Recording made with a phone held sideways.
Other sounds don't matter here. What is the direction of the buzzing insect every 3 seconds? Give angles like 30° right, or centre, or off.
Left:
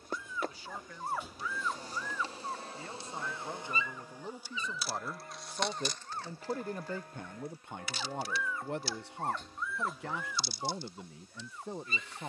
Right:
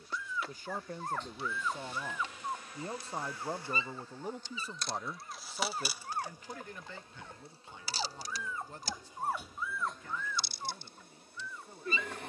40° left, 10° left, 30° right, 60° right.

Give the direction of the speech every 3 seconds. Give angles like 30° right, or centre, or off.
40° right, 10° right, 50° left, 70° left.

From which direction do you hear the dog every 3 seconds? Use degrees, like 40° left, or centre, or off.
10° left, 40° right, 40° right, 10° left.